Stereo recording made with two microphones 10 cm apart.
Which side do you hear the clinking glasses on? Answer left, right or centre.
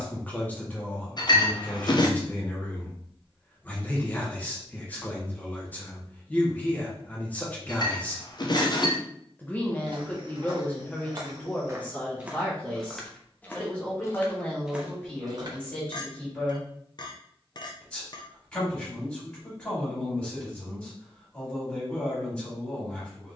left.